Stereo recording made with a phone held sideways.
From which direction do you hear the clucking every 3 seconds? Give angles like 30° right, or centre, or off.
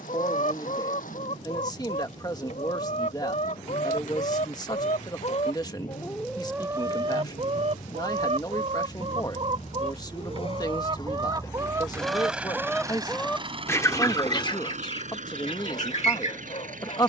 60° left, 60° left, 30° right, 40° right, 10° left, 50° left.